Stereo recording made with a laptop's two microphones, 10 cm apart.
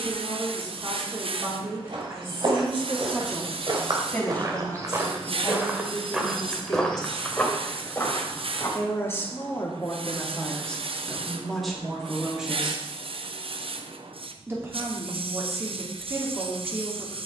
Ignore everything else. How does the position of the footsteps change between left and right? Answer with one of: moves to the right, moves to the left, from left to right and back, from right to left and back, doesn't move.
moves to the left.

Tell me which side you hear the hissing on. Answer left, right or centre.
right.